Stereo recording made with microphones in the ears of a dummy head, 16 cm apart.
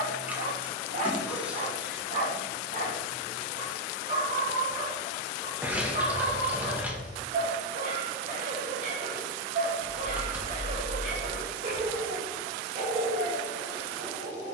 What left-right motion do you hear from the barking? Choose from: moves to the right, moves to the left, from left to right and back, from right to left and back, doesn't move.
doesn't move.